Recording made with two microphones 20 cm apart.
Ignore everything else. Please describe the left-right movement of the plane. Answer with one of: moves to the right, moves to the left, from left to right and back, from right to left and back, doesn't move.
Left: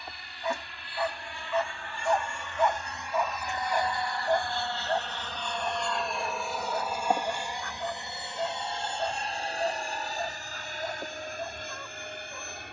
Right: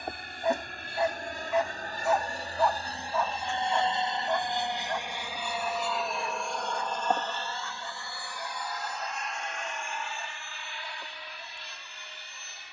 moves to the left.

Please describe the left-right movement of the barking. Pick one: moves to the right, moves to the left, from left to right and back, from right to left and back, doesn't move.
moves to the left.